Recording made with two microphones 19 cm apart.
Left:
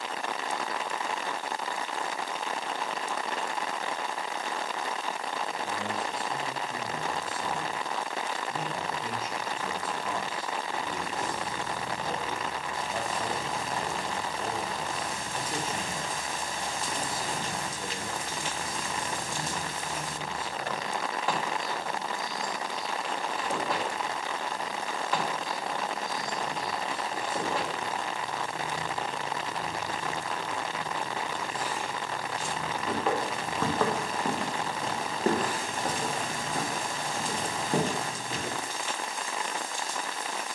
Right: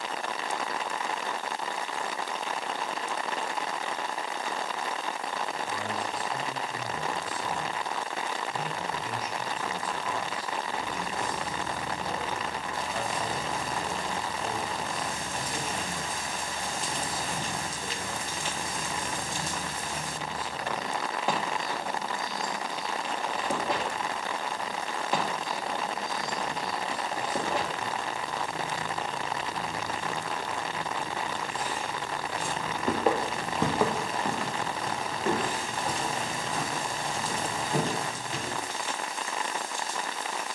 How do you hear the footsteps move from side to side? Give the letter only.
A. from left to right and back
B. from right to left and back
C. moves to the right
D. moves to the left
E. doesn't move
D.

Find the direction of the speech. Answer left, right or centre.
left.